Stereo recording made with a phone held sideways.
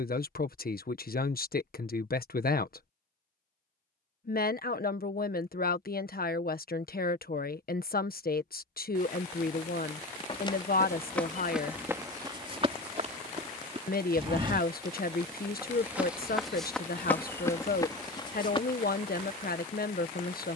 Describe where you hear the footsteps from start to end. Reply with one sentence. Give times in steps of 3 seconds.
In this clip you hear the footsteps not at all from 0 s, in the centre from 9 s, on the right from 12 s, in the centre from 15 s and on the left from 18 s.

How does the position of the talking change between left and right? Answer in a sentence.
You can hear the talking stay in one place.